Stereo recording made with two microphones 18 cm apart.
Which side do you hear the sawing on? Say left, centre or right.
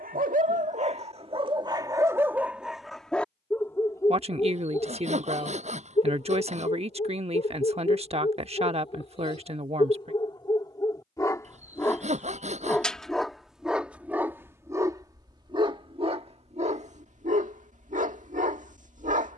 right.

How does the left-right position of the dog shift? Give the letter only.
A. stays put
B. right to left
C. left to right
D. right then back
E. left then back
E.